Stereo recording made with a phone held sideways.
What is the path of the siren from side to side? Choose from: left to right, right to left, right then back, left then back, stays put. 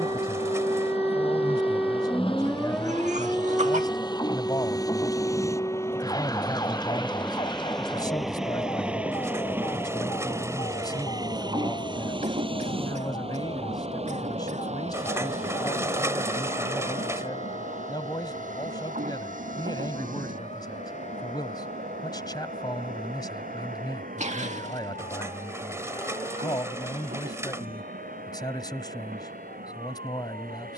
right to left.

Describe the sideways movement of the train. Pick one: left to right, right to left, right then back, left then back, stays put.
left to right.